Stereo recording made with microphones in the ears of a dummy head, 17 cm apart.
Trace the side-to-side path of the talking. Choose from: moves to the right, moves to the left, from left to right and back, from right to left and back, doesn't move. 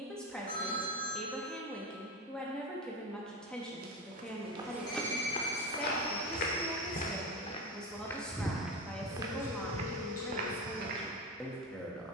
doesn't move.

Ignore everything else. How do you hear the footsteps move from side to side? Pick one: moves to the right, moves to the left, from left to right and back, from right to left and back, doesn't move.
from right to left and back.